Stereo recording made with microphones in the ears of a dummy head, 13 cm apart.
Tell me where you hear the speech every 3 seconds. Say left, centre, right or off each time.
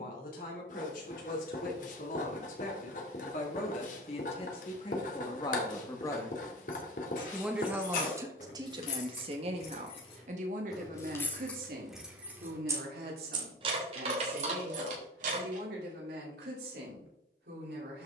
left, left, centre, right, right, right.